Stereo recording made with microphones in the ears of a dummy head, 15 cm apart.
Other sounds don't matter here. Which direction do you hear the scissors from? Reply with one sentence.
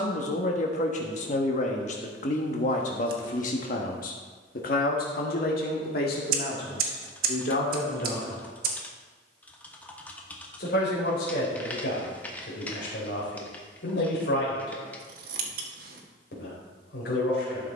You can hear the scissors on the right.